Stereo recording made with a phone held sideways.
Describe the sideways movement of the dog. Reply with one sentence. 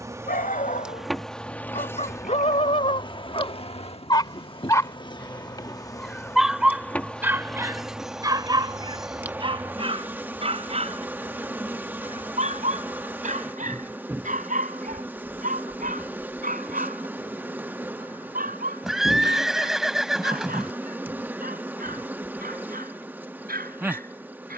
You can hear the dog travel towards the right.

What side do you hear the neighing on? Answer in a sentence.
In this clip you hear the neighing in the centre.